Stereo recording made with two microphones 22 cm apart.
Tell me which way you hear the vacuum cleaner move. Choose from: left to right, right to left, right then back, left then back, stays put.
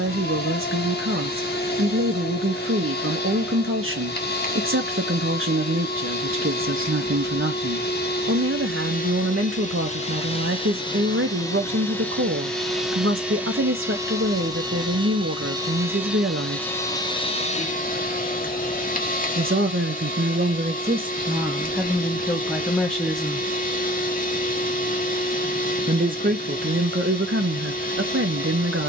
right then back.